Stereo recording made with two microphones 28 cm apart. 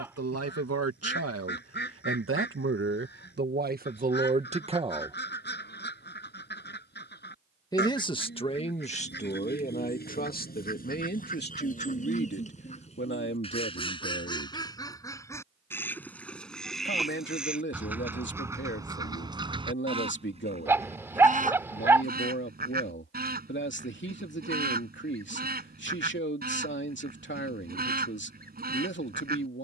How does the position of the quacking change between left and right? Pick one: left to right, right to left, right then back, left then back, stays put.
left to right.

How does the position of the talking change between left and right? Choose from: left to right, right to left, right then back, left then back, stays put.
right to left.